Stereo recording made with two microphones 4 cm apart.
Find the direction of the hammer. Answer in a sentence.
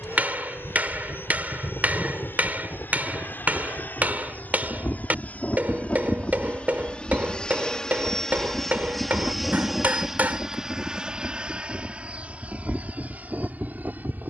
You can hear the hammer on the right.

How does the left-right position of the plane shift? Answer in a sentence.
You can hear the plane move from left to right.